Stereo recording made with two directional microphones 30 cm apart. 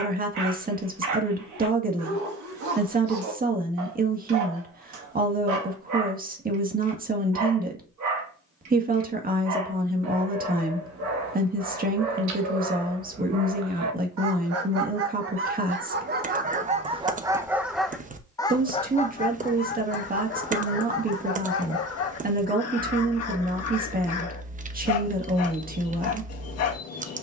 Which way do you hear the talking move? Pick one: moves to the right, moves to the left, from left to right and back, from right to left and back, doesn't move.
doesn't move.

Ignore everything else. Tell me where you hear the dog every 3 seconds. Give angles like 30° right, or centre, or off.
70° right, 70° right, 70° right, 70° right, 60° right, 20° right, 30° left, 50° left, 50° left.